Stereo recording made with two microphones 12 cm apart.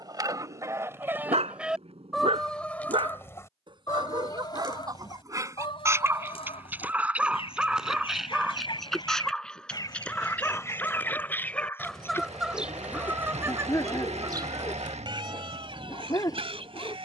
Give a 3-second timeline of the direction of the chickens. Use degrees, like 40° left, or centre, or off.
10° right, 40° left, 50° left, 20° left, 20° right, 50° right.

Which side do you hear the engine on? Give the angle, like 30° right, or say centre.
70° right.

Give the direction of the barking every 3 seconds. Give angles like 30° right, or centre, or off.
60° right, 30° right, 10° right, 10° left, 20° left, 30° left.